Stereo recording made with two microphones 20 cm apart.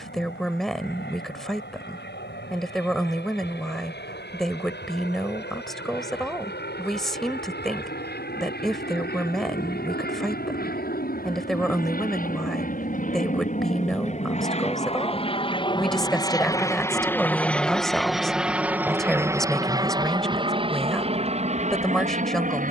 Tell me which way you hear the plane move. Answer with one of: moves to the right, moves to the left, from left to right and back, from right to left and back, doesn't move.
moves to the right.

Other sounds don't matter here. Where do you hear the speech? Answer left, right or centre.
centre.